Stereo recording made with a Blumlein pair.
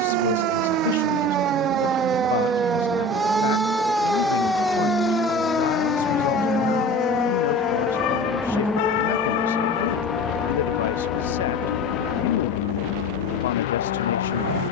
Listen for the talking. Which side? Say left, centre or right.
left.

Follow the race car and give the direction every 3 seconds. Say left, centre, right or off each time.
right, right, centre, left, left.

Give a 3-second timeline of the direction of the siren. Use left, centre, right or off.
right, centre, left, left, left.